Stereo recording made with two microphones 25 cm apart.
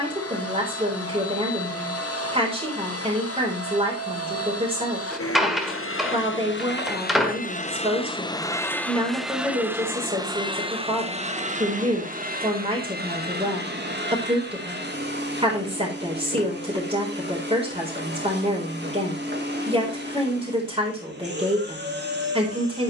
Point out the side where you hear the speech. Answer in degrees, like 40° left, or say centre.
20° right.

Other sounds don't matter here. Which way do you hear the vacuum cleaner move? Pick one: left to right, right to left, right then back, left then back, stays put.
left to right.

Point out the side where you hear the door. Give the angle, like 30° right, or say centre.
centre.